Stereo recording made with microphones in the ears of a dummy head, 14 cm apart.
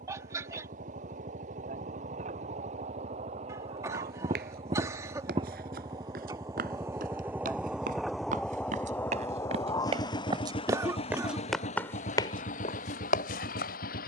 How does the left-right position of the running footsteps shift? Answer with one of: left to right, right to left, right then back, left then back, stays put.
right to left.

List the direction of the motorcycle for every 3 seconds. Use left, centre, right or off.
right, right, centre, left, left.